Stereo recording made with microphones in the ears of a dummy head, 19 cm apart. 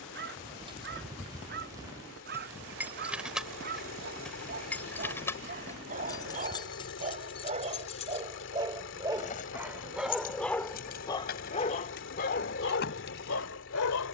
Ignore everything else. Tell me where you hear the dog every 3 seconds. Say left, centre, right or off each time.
right, right, right, centre, left.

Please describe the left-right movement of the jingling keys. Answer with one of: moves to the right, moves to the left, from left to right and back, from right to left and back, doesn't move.
moves to the left.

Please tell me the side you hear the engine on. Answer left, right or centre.
left.